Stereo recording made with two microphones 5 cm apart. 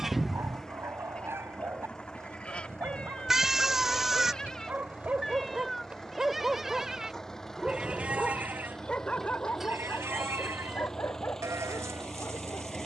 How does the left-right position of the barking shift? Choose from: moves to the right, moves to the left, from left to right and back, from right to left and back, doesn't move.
moves to the left.